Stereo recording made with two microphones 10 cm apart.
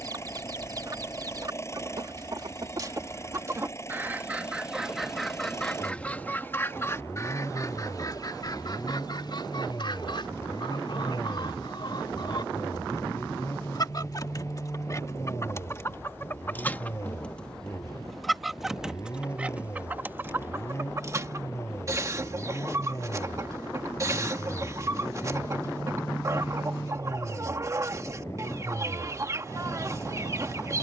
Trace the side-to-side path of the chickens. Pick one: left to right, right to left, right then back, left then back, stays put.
left then back.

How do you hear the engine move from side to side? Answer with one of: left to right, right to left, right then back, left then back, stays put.
stays put.